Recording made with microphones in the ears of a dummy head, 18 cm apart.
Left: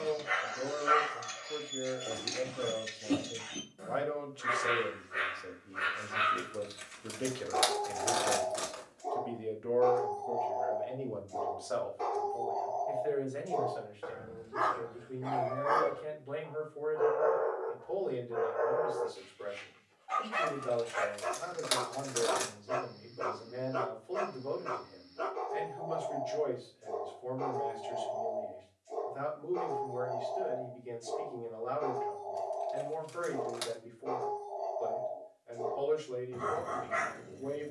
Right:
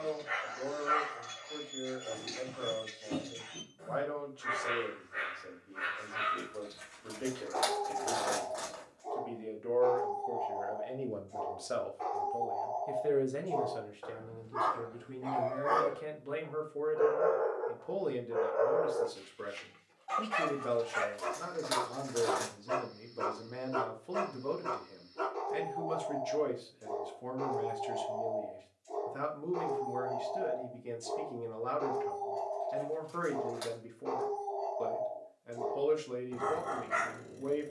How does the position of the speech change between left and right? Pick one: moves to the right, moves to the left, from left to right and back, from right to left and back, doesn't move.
moves to the right.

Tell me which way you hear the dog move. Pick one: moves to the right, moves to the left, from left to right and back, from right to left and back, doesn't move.
moves to the right.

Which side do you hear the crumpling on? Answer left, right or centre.
left.